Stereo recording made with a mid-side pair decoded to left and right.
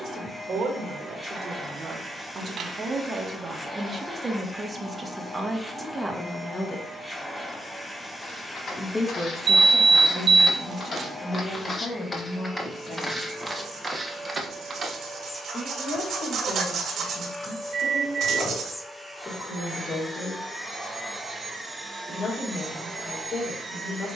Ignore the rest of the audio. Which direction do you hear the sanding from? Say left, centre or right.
right.